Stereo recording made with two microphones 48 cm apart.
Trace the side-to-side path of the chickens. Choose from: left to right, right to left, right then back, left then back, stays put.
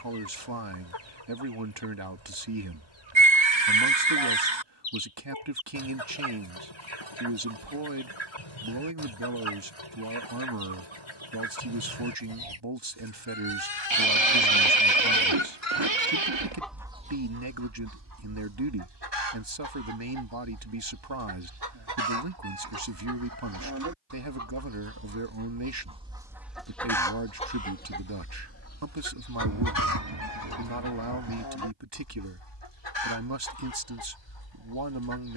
right then back.